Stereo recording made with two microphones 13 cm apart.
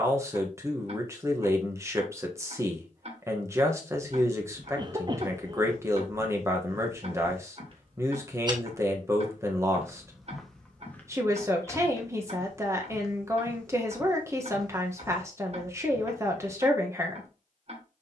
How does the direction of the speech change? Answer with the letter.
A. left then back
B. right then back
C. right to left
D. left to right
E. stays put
E.